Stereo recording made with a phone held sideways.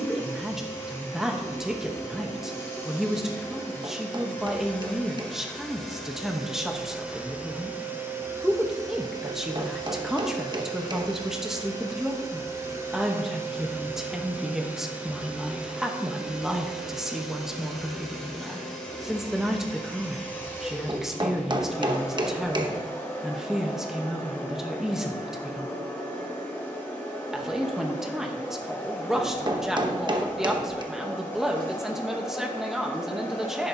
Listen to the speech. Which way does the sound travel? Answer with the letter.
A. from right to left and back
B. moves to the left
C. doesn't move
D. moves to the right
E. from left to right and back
C.